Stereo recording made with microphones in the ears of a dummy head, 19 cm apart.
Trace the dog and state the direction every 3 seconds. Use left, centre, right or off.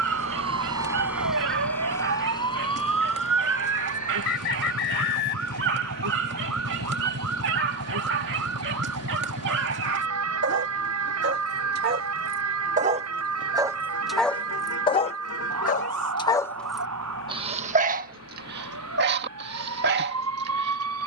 right, right, right, right, centre, centre, right.